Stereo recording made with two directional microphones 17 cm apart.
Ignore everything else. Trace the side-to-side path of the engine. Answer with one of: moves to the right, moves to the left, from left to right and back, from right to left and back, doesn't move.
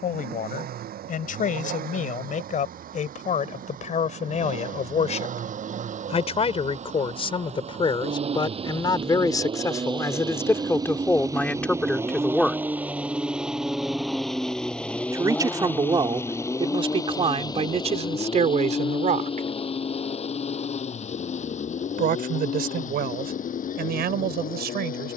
moves to the left.